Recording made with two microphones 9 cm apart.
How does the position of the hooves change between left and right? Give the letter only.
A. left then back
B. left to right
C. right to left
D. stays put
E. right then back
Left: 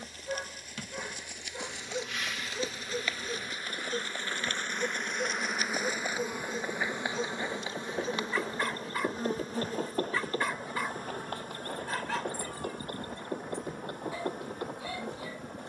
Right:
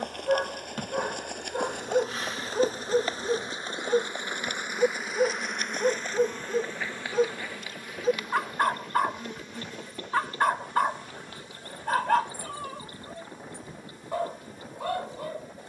C.